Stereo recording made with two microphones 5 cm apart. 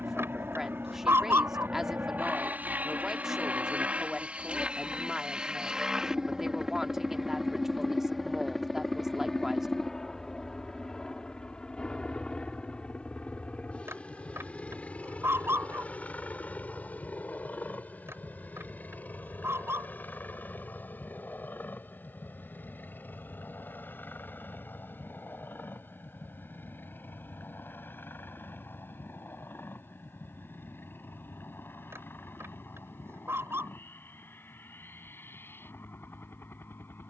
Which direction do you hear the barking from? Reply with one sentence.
In this clip you hear the barking on the right.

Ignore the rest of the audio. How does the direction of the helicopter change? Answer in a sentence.
In this clip you hear the helicopter go from the right side to the left.